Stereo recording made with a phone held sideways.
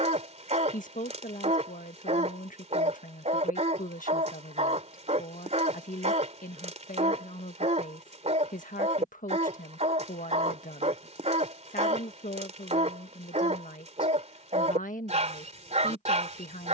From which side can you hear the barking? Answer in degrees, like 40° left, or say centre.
50° right.